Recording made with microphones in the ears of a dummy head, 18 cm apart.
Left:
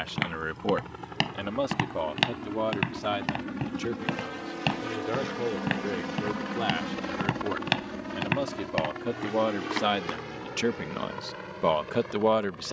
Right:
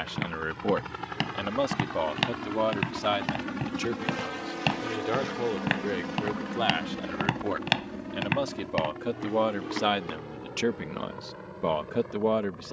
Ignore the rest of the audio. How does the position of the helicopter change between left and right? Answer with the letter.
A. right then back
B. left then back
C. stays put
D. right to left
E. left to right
D.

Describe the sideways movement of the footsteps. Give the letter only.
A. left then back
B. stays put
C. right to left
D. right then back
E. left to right
D.